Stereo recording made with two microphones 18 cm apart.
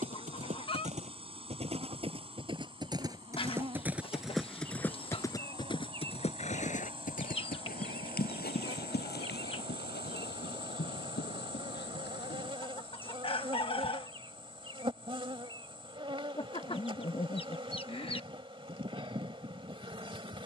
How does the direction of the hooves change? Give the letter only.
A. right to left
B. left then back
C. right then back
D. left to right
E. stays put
A.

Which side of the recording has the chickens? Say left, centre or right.
left.